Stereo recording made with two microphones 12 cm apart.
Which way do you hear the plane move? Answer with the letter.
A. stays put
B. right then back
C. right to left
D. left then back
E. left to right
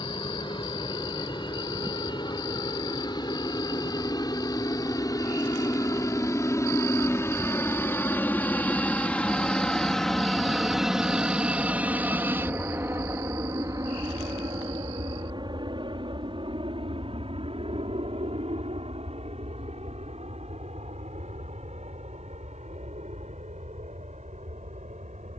E.